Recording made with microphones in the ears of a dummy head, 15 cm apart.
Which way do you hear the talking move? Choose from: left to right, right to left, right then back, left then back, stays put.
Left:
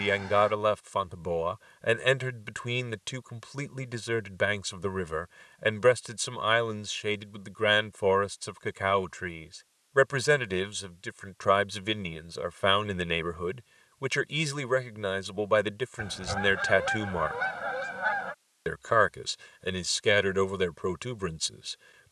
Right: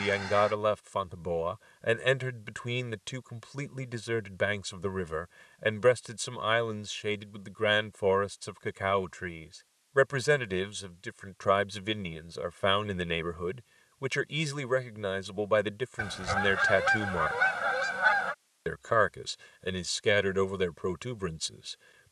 stays put.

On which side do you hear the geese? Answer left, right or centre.
right.